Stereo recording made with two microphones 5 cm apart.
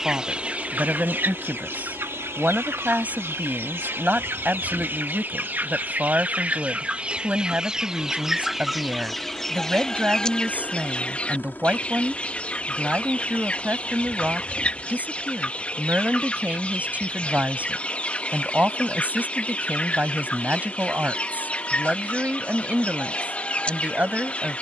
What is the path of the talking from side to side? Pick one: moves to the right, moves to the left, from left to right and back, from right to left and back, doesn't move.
doesn't move.